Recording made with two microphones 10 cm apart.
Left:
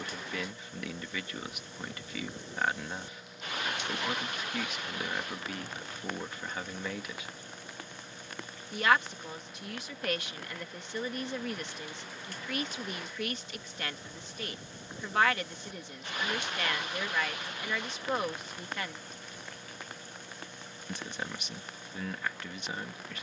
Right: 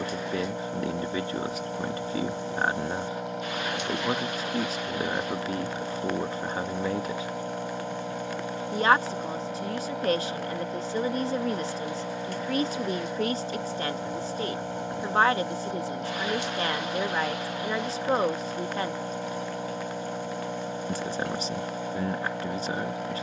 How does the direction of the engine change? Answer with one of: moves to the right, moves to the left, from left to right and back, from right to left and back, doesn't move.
doesn't move.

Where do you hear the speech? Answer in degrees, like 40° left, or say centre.
30° right.